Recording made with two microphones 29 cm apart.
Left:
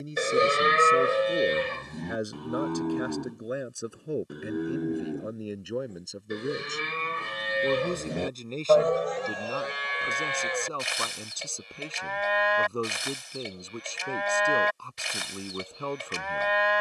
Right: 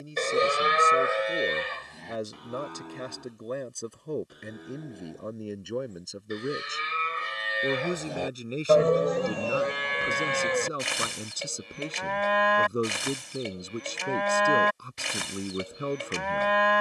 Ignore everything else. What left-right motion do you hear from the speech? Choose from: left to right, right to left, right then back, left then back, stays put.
left to right.